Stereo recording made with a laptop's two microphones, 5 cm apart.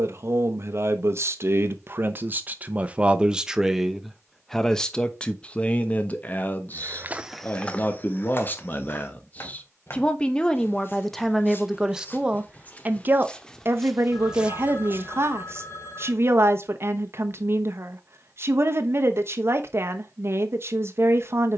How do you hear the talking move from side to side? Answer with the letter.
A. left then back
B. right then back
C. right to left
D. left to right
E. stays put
A.